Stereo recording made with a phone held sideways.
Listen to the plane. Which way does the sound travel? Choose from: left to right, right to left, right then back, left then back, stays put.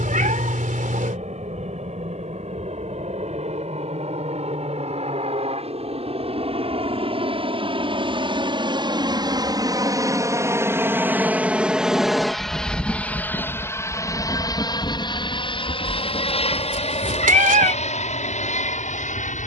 right to left.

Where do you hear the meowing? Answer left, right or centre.
right.